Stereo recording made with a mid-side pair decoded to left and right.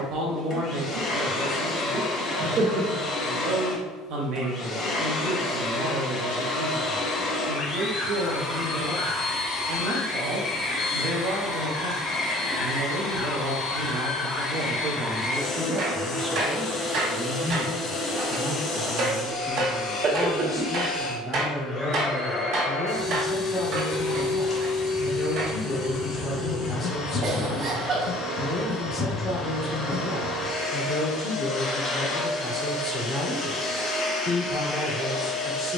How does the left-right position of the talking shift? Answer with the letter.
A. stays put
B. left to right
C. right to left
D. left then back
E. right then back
C.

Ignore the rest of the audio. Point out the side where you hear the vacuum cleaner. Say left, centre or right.
left.